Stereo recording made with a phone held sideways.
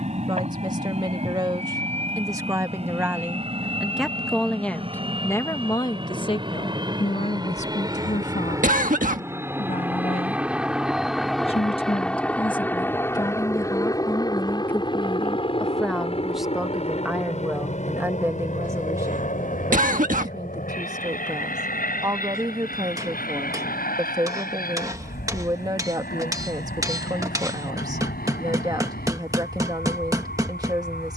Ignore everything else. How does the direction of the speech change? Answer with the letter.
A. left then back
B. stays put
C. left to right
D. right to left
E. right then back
A.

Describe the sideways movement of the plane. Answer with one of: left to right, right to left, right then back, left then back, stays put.
right to left.